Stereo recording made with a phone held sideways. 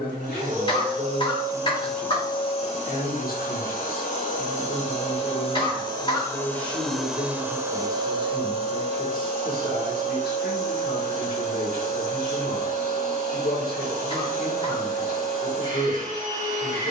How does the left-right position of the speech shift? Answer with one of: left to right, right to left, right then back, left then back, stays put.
stays put.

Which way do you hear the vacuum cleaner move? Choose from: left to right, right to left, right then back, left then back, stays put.
left then back.